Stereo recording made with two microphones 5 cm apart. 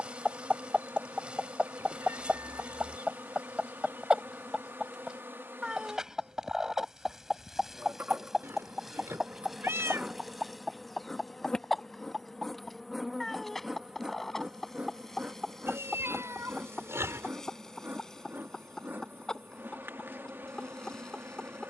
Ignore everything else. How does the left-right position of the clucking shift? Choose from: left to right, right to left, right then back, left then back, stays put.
right to left.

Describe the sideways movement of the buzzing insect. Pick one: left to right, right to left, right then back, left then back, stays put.
left then back.